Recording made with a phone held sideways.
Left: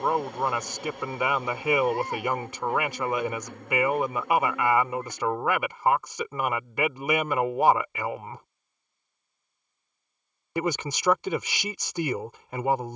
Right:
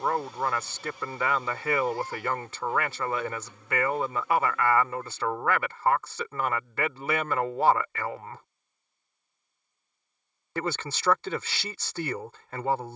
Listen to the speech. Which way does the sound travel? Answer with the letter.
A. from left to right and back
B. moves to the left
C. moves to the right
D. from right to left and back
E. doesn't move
E.